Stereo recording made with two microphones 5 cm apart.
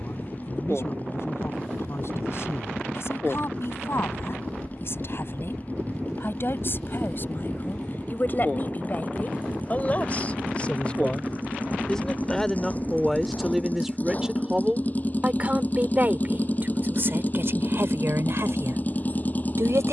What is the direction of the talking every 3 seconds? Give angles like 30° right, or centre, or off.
60° left, 50° left, 40° left, 30° left, centre, 40° right, 60° right.